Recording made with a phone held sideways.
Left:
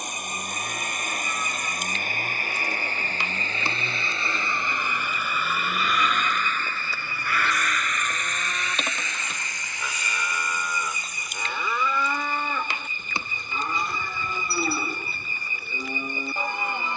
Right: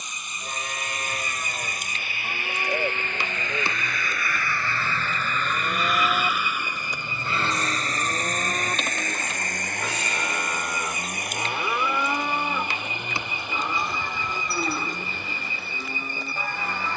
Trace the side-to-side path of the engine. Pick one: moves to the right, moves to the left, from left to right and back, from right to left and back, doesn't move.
moves to the right.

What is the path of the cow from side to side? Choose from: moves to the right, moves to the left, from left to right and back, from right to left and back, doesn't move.
moves to the left.